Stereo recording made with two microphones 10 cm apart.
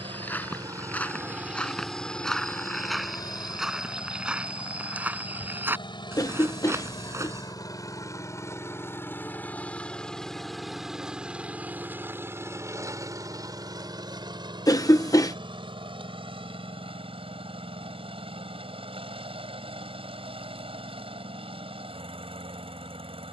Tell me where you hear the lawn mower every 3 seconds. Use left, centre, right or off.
centre, left, left, centre, right, right, right, right.